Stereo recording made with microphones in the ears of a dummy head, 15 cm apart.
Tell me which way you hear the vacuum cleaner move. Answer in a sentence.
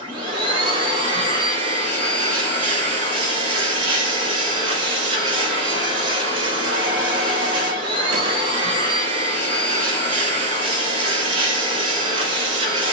You can hear the vacuum cleaner stay in one place.